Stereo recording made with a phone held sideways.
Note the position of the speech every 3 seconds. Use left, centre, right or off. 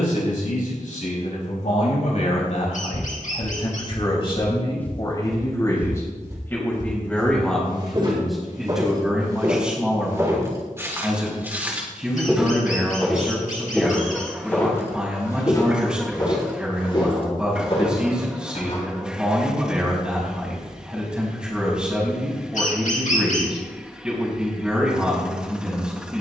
left, left, centre, centre, centre, centre, centre, centre, centre.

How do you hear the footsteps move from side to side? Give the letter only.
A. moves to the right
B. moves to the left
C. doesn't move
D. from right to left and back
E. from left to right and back
E.